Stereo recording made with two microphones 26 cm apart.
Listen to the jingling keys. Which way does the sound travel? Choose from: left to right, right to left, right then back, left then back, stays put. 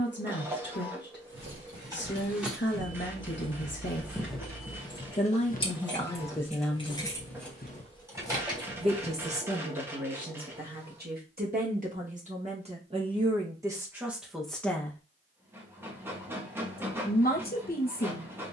left then back.